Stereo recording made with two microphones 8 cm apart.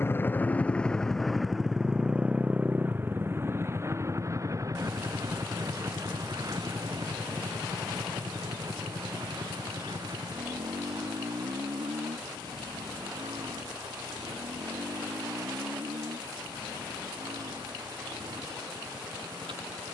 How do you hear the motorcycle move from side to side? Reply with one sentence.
You can hear the motorcycle travel towards the right.